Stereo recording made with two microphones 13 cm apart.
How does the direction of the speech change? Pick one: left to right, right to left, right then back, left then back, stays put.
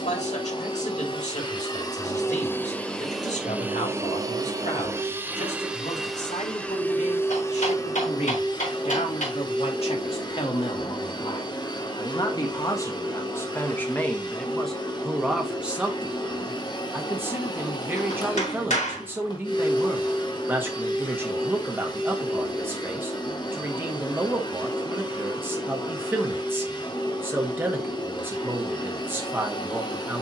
left to right.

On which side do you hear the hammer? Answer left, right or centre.
left.